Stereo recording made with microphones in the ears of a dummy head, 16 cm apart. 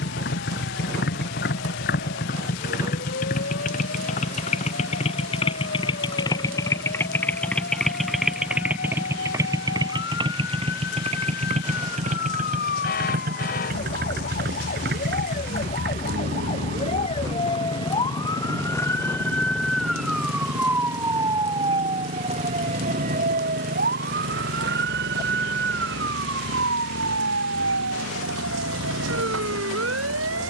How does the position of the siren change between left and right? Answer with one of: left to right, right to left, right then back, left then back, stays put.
left to right.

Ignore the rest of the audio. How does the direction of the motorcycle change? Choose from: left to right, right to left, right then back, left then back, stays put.
left to right.